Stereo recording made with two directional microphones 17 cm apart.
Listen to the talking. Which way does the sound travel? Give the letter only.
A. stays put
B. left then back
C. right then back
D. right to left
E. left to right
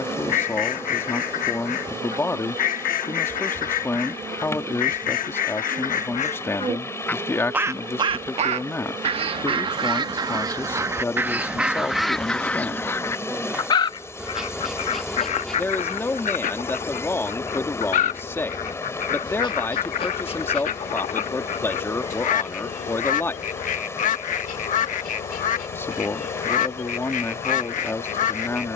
A.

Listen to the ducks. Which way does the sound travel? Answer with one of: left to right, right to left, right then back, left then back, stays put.
right then back.